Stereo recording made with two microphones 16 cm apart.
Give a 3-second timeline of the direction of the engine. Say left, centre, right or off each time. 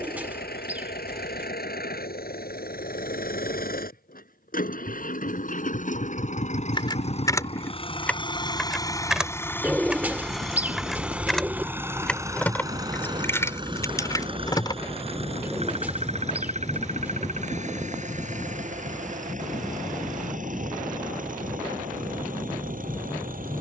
left, left, left, centre, right, right, right, right.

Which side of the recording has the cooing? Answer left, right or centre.
centre.